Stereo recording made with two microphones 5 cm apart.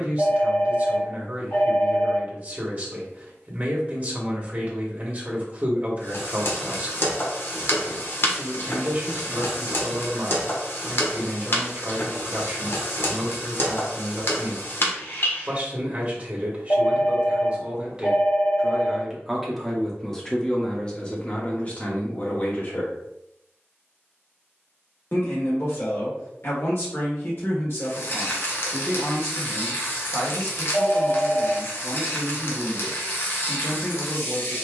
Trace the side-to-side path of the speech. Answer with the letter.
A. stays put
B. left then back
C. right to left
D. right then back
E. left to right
C.